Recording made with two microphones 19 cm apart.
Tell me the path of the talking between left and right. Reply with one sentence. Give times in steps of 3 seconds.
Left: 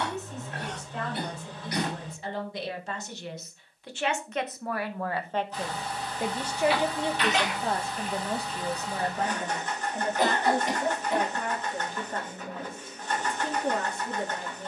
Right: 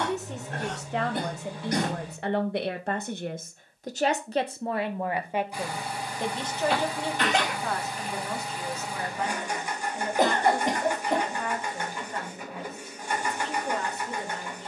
In this clip you hear the talking on the right from 0 s and on the left from 6 s.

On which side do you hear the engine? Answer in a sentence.
In this clip you hear the engine in the centre.